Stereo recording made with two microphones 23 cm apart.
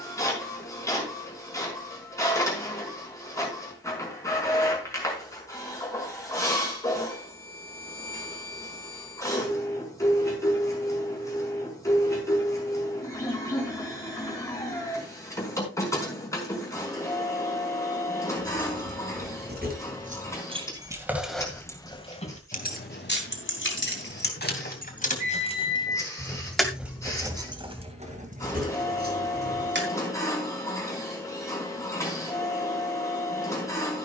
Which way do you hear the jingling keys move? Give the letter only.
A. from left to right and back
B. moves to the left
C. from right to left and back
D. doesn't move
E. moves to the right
C.